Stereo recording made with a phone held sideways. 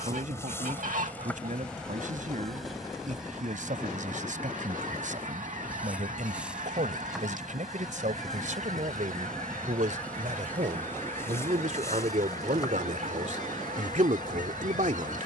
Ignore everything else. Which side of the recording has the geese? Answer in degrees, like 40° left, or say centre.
60° right.